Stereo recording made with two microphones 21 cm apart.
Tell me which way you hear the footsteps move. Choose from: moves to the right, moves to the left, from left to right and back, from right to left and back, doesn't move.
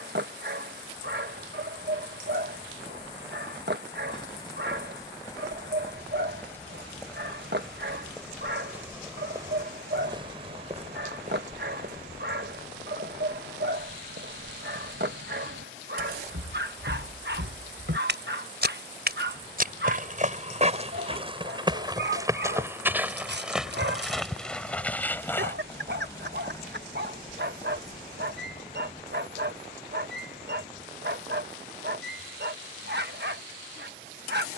from left to right and back.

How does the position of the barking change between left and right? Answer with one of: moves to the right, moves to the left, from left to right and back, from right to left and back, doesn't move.
doesn't move.